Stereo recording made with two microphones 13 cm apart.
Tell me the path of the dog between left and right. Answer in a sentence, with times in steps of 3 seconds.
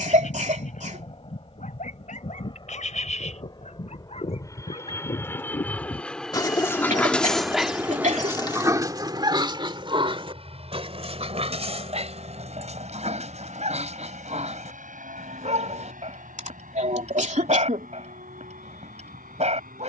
You can hear the dog on the left from 0 s, in the centre from 6 s and on the right from 9 s.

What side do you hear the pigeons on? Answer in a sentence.
You can hear the pigeons on the left.